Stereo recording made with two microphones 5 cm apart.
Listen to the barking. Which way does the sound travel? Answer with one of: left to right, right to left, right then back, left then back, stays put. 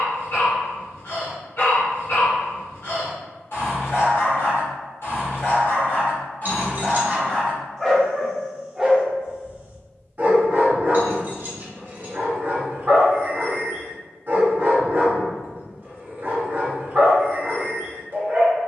left to right.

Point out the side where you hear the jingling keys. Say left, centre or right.
right.